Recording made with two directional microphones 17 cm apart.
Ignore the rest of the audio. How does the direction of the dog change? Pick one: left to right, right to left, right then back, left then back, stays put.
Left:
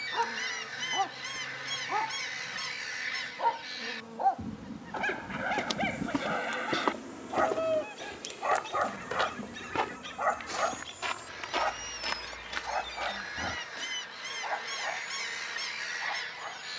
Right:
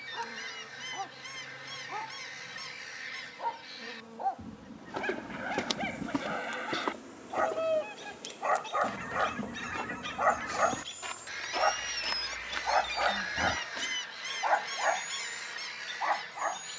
left to right.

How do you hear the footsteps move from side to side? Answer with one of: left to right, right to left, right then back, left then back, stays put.
left then back.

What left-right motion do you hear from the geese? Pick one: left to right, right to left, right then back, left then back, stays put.
right then back.